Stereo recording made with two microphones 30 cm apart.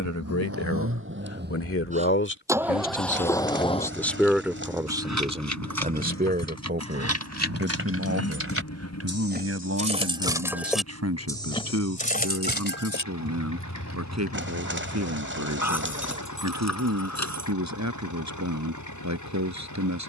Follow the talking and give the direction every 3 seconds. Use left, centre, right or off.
left, centre, right, right, right, right, right.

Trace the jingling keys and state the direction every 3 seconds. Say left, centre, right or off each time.
right, right, right, centre, left, left, off.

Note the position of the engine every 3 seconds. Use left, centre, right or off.
right, left, left, left, left, left, left.